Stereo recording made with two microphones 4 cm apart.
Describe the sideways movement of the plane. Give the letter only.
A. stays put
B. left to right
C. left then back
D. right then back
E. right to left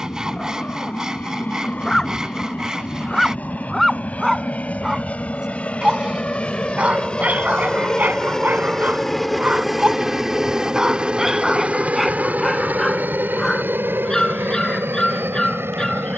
B.